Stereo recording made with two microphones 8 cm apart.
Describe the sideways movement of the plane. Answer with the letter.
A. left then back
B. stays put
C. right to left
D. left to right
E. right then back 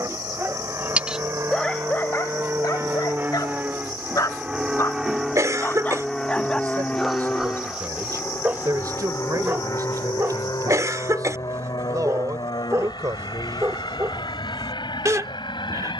C.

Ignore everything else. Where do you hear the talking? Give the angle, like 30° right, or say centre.
50° right.